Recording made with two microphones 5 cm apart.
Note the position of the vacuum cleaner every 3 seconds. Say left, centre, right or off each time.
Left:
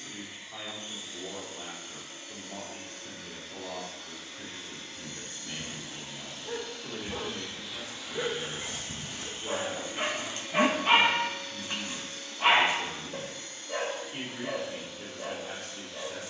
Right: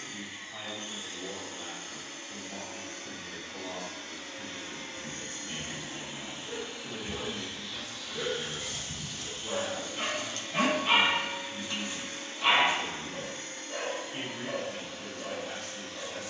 right, right, centre, centre, right, right.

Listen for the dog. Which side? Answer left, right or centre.
left.